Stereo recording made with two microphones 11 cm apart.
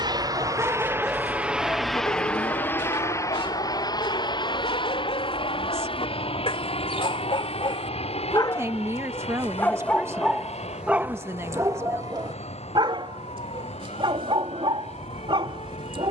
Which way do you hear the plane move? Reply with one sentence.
In this clip you hear the plane move from right to left.